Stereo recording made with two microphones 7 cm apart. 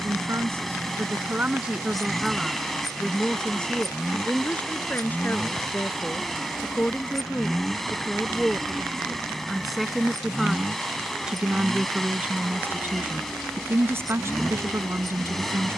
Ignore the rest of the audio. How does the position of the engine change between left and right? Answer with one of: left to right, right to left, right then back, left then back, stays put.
stays put.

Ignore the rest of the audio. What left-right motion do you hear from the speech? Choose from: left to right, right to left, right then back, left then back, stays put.
left then back.